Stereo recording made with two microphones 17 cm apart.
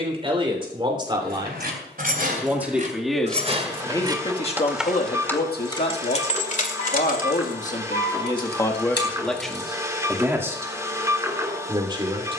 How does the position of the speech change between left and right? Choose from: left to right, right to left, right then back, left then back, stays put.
left then back.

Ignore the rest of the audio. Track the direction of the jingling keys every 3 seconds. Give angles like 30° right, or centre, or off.
50° right, 10° right, 60° left, 70° left.